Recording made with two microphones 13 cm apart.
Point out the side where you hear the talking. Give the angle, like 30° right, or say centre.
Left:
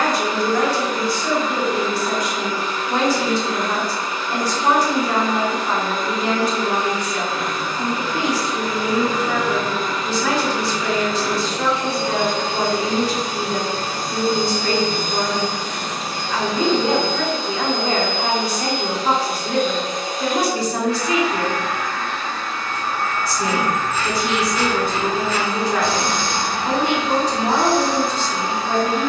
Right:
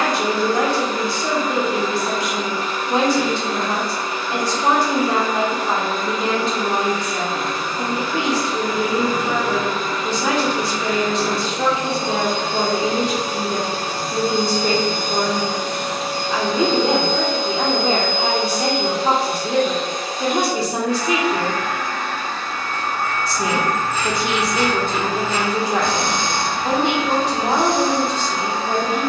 20° right.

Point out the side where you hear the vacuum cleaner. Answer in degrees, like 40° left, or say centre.
50° right.